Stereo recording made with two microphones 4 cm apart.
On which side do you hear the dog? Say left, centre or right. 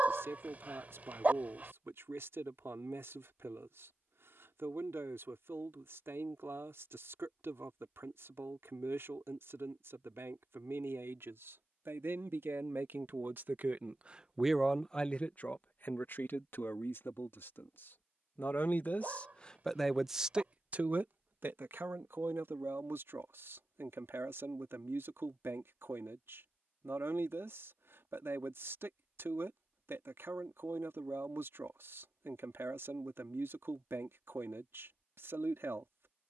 right.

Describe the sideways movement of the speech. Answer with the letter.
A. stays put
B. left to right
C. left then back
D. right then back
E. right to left
C.